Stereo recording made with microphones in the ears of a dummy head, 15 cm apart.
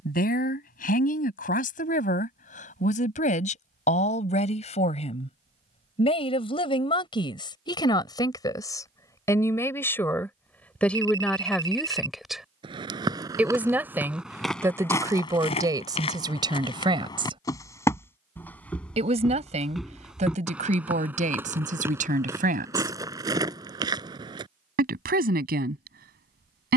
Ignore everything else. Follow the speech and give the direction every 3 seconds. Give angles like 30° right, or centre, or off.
50° left, 40° left, 30° left, 10° left, 10° right, 20° right, 40° right, 50° right, 50° right.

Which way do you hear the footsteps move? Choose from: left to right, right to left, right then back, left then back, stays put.
left then back.